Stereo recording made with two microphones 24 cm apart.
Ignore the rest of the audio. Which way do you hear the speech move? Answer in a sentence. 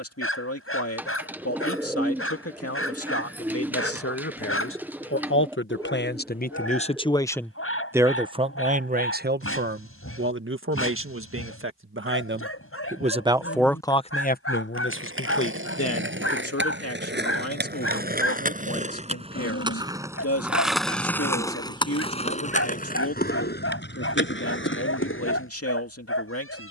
In this clip you hear the speech move from left to right and back again.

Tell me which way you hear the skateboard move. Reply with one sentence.
You can hear the skateboard move from right to left.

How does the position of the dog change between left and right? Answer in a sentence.
You can hear the dog stay put.